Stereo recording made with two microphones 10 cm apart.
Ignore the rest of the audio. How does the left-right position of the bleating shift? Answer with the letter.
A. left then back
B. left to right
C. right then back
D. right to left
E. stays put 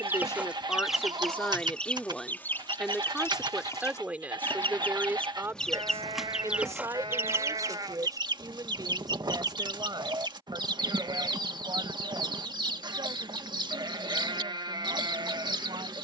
E.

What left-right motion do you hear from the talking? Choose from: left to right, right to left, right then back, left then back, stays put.
left to right.